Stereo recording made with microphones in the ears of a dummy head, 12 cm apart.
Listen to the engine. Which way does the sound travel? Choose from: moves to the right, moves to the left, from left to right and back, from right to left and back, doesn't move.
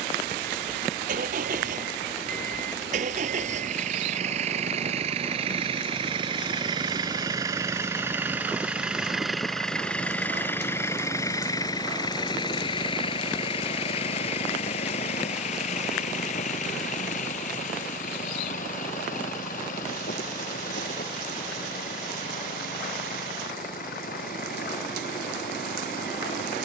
moves to the left.